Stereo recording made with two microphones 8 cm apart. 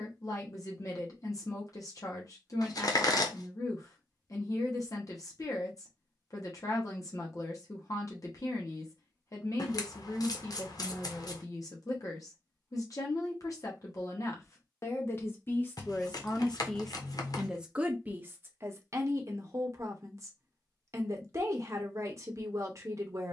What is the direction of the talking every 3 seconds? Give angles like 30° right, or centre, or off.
50° left, 50° left, 50° left, 50° left, 40° left, 10° left, 40° right, 40° right.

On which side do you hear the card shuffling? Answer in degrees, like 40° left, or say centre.
60° left.